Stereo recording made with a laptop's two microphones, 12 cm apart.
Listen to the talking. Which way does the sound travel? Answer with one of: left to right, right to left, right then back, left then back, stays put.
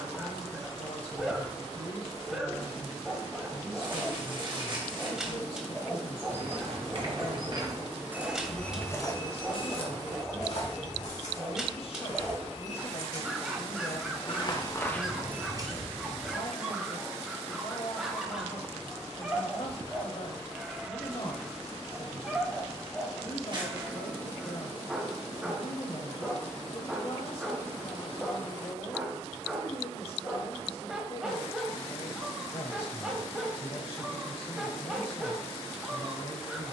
stays put.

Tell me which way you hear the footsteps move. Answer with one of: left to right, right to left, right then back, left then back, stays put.
left then back.